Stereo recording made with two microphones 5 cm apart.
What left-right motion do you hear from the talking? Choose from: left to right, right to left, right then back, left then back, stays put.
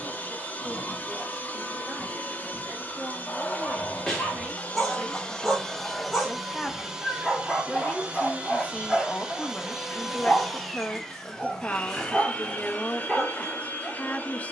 right to left.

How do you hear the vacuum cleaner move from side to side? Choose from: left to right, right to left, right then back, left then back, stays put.
right then back.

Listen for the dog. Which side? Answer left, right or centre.
centre.